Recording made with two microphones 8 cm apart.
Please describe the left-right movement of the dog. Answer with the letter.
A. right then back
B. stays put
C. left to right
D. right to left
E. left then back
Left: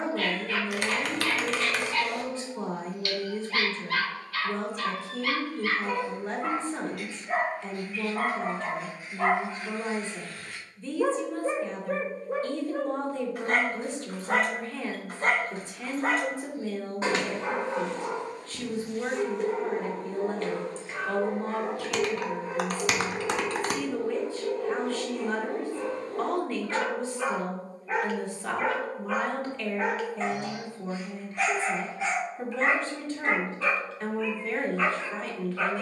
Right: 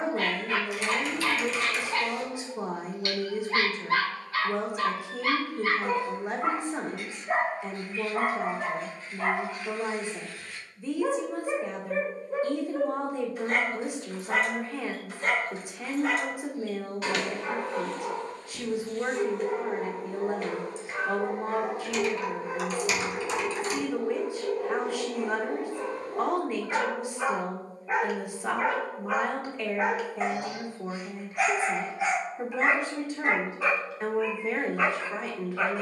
E.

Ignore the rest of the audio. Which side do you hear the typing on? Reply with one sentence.
You can hear the typing on the left.